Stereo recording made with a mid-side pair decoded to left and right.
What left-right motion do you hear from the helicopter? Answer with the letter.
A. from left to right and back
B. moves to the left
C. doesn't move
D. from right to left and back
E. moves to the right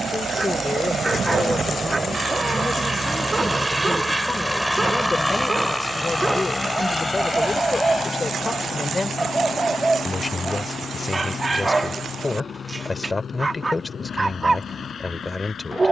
B.